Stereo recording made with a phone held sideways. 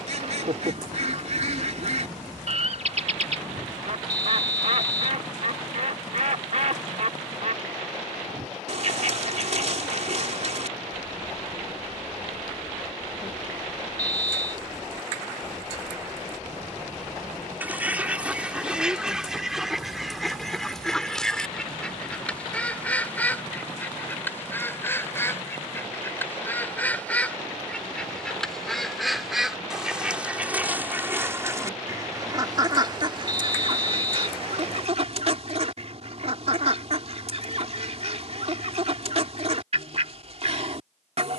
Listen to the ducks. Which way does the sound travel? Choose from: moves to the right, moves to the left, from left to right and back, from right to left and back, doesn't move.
from right to left and back.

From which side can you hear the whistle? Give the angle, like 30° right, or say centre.
60° left.